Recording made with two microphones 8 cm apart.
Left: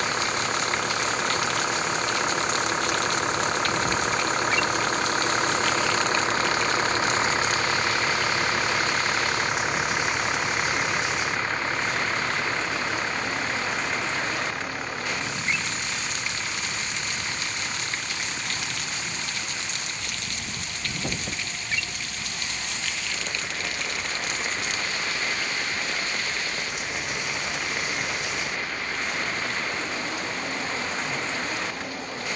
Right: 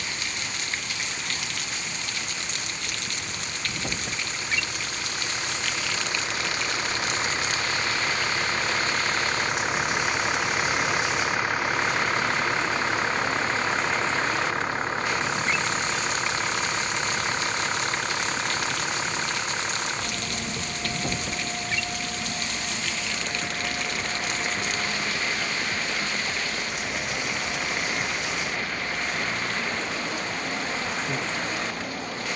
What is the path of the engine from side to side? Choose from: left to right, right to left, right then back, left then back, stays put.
left to right.